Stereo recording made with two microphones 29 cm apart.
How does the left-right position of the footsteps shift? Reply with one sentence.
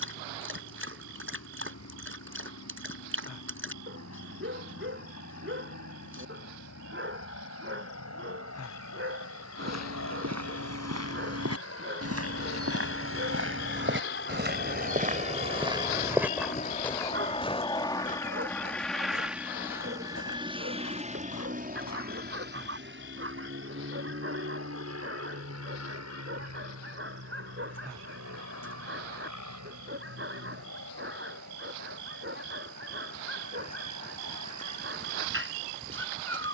In this clip you hear the footsteps go from the right side to the left.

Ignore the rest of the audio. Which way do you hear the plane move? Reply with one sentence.
You can hear the plane travel towards the right.